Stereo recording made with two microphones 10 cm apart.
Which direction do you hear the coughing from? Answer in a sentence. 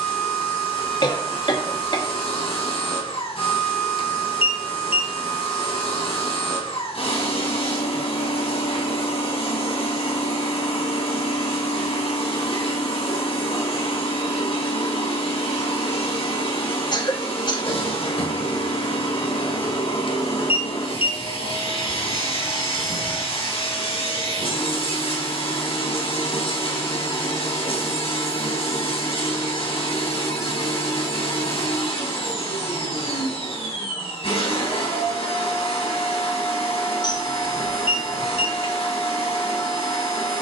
In this clip you hear the coughing on the left.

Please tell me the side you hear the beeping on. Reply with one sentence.
In this clip you hear the beeping on the left.